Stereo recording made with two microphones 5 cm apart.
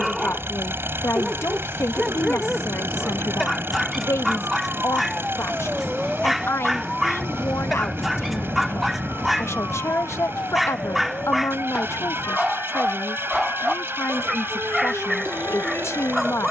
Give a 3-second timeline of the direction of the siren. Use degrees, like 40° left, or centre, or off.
50° right, 20° right, 10° left, 40° left, 60° left, 60° left.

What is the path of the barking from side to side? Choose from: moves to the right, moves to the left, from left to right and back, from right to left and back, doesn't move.
doesn't move.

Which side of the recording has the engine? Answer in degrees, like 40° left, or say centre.
50° right.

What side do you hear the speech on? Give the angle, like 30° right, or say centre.
70° left.